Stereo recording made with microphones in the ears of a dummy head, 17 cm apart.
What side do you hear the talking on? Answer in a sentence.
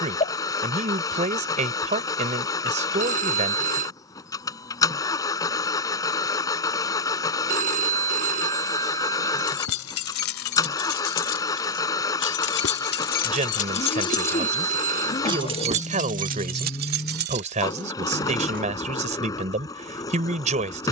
You can hear the talking on the right.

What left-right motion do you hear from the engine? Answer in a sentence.
You can hear the engine stay put.